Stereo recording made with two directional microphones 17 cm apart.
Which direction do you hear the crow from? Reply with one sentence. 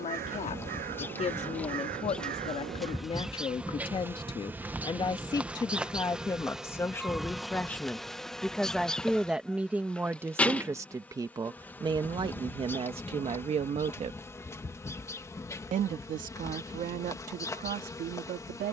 You can hear the crow on the right.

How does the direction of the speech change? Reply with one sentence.
You can hear the speech travel towards the right.